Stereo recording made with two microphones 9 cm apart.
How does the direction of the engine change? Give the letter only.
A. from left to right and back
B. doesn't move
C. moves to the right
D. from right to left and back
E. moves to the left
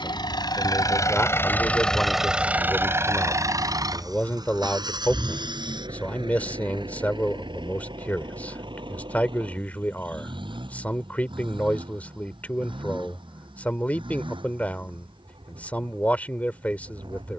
C.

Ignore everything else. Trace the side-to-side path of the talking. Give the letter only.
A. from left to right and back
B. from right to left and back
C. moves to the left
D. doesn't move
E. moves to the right
D.